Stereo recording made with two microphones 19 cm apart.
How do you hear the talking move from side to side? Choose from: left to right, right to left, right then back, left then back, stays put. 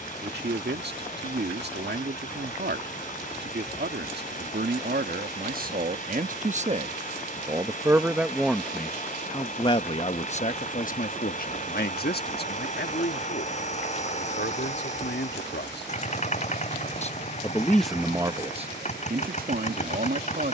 left then back.